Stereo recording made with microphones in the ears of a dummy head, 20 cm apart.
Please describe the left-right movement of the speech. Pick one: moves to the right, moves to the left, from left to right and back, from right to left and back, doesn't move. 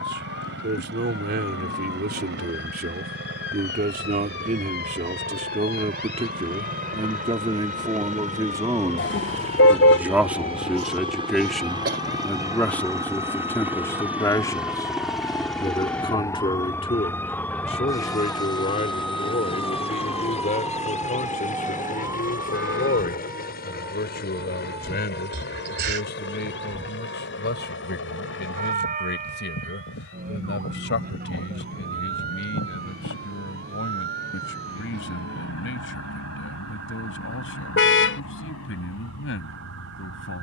moves to the left.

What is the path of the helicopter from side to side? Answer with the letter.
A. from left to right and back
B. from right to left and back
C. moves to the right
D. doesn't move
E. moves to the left
E.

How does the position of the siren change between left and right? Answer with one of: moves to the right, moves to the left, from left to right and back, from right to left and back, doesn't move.
moves to the right.